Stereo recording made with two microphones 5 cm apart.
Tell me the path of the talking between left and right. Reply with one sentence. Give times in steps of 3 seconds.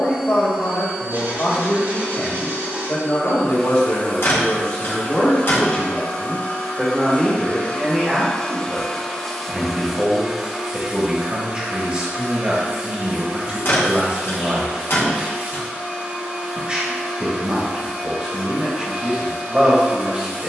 You can hear the talking on the left from 0 s, in the centre from 6 s and on the right from 9 s.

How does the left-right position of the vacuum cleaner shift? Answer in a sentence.
You can hear the vacuum cleaner move from right to left and back again.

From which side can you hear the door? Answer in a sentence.
In this clip you hear the door on the left.